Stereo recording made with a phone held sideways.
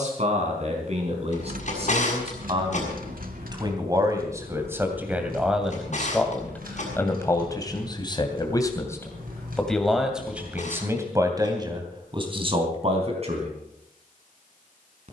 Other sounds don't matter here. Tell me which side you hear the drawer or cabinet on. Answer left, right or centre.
left.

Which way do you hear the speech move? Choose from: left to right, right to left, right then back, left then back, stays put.
left then back.